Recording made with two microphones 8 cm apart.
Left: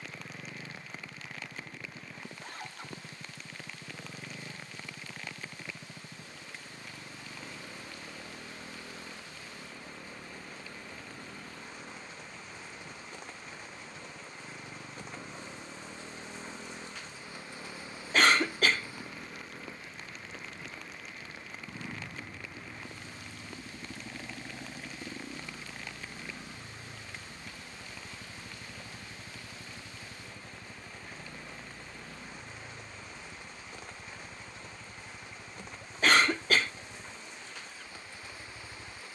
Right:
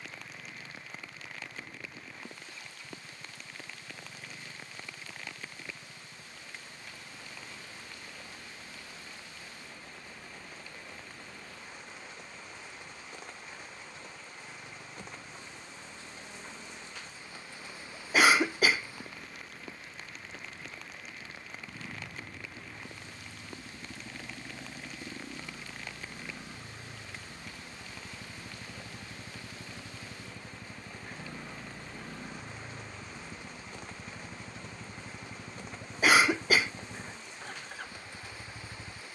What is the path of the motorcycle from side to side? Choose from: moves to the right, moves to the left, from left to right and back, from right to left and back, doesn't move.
moves to the right.